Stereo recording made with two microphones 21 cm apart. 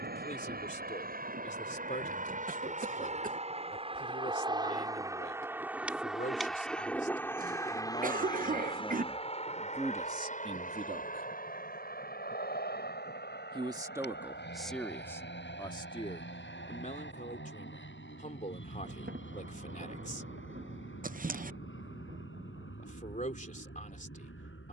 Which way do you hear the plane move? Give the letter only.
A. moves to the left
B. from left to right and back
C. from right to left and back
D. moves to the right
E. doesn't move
A.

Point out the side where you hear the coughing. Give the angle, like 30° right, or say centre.
40° right.